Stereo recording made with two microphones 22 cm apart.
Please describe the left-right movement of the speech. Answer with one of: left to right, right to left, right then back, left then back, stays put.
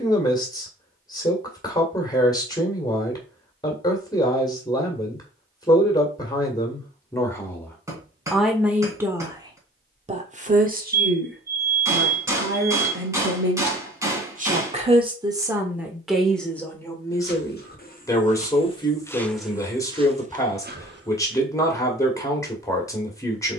right then back.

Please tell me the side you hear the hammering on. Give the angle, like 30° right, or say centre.
10° right.